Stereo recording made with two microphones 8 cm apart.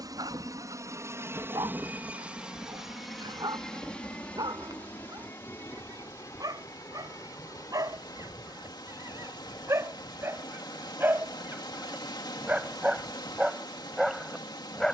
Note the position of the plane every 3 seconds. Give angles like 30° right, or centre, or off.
30° right, 20° left, 40° left, 40° left, 50° left.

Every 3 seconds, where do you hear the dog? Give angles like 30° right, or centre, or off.
60° right, 60° right, 50° right, 30° right, 10° right.